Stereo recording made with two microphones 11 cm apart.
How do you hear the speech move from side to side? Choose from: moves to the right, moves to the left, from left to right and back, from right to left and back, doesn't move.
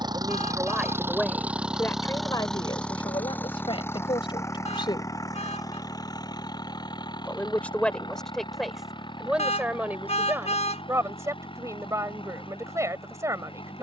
from right to left and back.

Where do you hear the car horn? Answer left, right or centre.
left.